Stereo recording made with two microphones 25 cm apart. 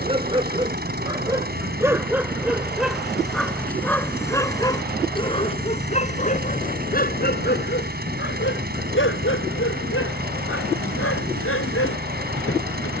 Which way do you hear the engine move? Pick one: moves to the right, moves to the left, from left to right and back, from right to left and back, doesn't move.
doesn't move.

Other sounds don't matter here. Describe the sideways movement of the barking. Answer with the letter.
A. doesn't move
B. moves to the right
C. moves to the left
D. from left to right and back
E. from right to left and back
C.